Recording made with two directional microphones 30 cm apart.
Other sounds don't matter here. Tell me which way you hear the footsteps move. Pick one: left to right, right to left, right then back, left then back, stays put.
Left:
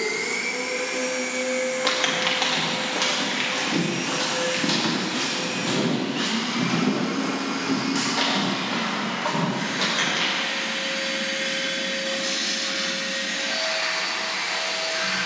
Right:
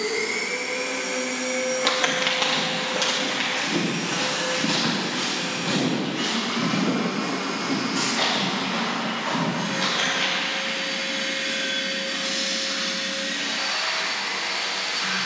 right to left.